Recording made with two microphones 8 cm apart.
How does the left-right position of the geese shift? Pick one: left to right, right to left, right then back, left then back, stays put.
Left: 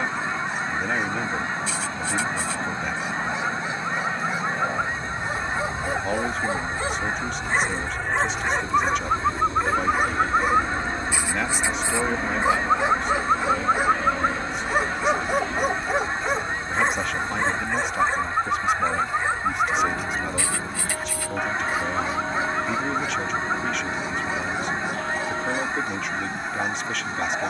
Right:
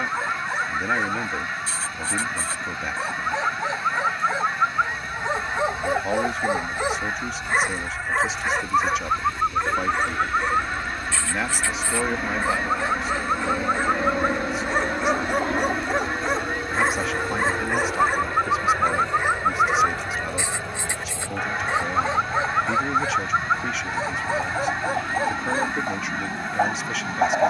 stays put.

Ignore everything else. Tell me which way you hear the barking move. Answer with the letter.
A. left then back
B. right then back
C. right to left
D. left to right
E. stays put
A.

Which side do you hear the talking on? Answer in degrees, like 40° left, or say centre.
centre.